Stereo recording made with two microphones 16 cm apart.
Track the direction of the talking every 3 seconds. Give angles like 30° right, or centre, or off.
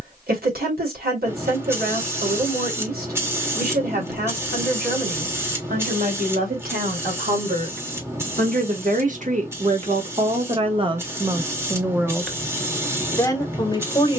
80° right, 70° right, 70° right, 40° right, 20° left.